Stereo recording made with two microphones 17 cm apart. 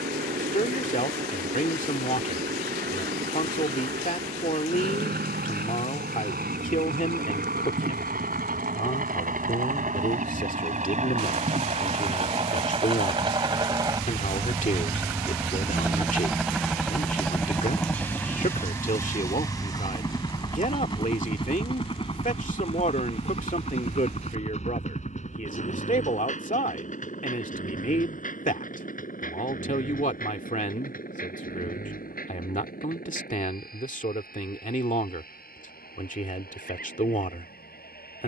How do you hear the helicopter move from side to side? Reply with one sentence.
In this clip you hear the helicopter move from right to left.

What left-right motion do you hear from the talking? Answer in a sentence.
In this clip you hear the talking stay put.